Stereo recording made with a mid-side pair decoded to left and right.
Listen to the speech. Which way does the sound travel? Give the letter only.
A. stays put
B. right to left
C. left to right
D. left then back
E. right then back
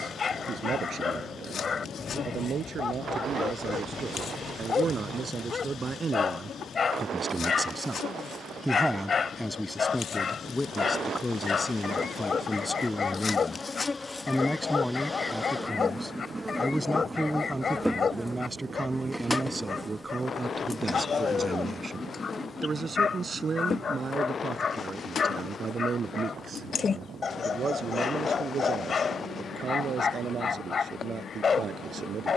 D.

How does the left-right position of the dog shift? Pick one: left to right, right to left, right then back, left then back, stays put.
stays put.